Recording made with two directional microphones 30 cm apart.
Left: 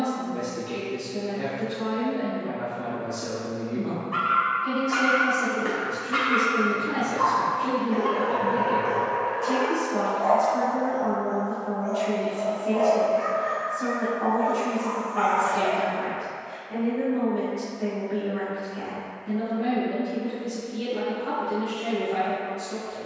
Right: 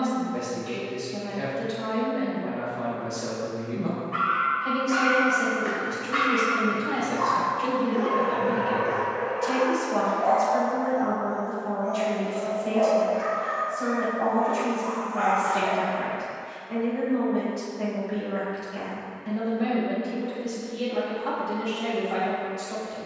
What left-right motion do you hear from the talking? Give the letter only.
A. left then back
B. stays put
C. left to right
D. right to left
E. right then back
B.